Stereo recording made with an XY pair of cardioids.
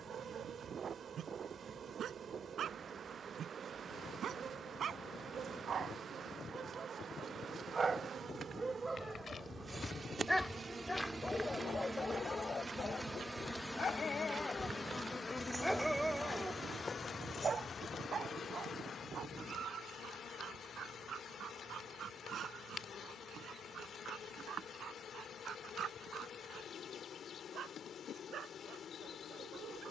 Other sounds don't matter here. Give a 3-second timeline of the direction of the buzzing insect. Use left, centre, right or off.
right, right, right, right, centre, left, left, left, left, left.